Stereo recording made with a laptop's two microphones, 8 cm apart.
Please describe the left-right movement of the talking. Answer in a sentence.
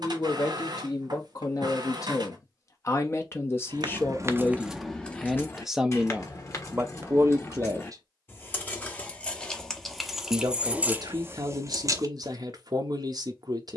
In this clip you hear the talking move to the right.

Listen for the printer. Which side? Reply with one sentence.
In this clip you hear the printer on the right.